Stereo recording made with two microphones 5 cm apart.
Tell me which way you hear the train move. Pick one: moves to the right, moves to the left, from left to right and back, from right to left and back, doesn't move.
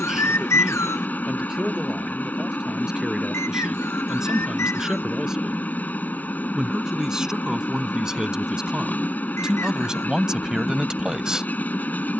doesn't move.